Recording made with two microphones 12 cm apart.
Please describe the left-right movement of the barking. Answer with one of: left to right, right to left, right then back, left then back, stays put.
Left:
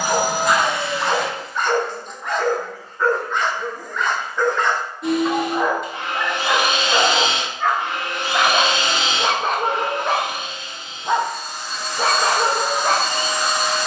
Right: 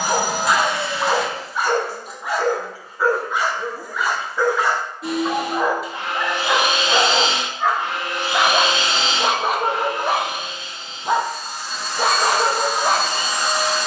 stays put.